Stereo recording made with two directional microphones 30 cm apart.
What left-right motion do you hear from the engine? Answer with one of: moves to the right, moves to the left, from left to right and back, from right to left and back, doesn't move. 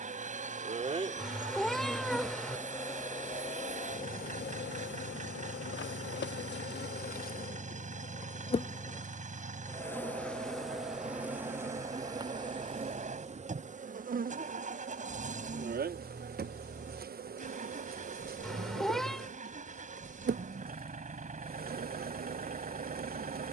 doesn't move.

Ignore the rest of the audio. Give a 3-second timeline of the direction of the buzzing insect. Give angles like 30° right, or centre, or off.
10° right, 30° left, 30° left, centre, 20° right, 30° right, 30° right, 30° right.